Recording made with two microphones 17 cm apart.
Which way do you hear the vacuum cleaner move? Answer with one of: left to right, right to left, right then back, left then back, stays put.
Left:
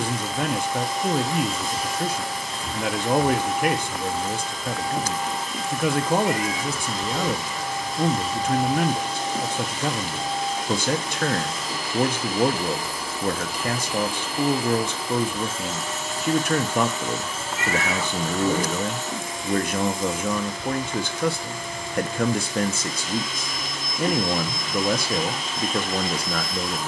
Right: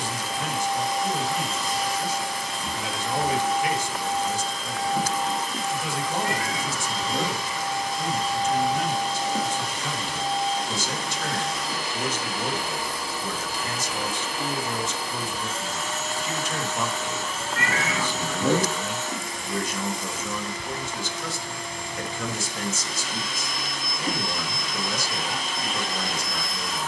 stays put.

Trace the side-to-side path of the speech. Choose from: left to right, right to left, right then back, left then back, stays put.
stays put.